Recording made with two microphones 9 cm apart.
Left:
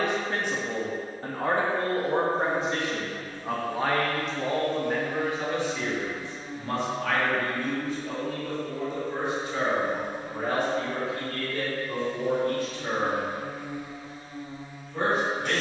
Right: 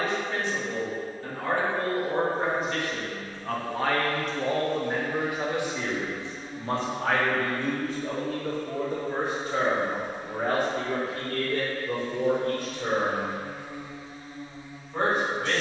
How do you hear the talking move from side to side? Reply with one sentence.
In this clip you hear the talking move from left to right.